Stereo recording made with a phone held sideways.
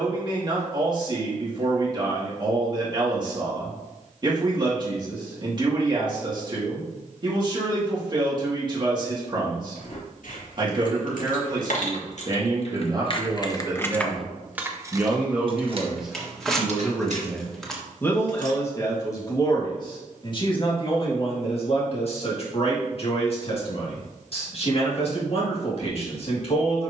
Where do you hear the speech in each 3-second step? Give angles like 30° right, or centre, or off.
30° right, 30° right, 30° right, 30° right, 30° right, centre, 30° left, 50° left, 50° left.